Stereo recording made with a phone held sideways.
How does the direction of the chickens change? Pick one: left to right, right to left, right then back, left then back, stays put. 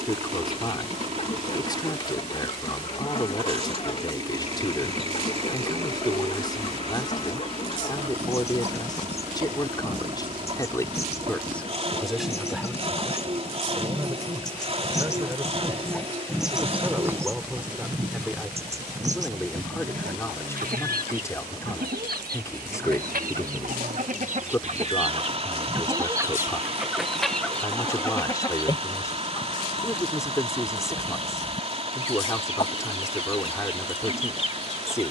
right then back.